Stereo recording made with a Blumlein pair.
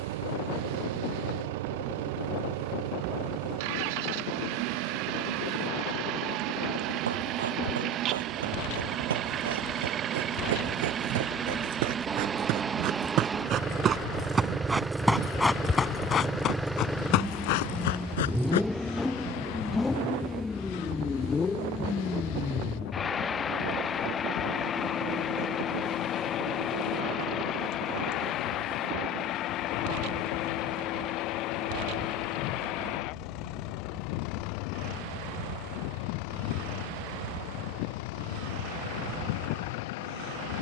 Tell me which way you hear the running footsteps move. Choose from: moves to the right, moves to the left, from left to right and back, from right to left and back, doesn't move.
moves to the left.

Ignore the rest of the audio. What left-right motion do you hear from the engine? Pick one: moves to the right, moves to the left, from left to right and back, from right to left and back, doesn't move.
moves to the left.